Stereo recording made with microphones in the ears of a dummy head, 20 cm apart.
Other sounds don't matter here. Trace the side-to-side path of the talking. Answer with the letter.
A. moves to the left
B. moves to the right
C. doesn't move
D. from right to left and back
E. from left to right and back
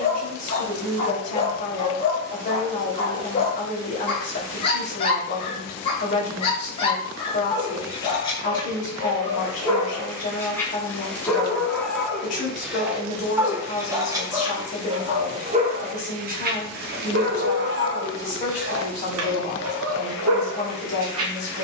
C.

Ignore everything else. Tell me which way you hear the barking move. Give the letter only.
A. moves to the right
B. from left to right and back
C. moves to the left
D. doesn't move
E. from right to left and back
A.